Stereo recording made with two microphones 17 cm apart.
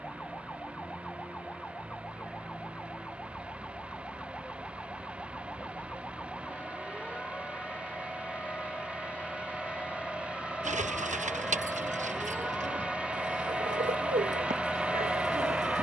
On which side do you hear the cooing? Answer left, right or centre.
right.